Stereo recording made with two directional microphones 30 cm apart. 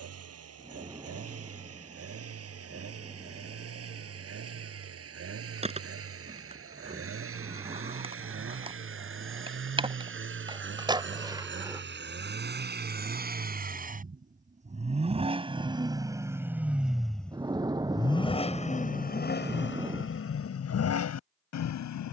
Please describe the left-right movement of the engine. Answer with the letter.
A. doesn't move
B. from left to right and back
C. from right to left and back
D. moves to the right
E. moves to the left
E.